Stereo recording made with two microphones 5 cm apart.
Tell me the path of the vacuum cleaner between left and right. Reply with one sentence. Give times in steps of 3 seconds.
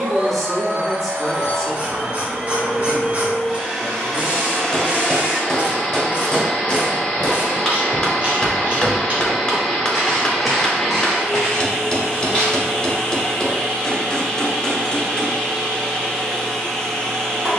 In this clip you hear the vacuum cleaner on the right from 0 s and in the centre from 3 s.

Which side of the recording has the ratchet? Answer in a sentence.
In this clip you hear the ratchet on the right.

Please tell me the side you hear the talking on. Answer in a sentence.
You can hear the talking in the centre.